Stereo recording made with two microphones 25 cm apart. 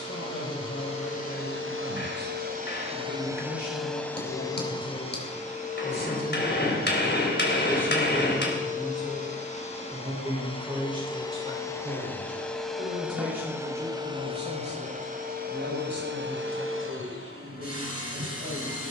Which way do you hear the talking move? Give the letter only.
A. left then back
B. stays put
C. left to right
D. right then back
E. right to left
C.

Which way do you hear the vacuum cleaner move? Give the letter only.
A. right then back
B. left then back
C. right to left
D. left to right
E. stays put
B.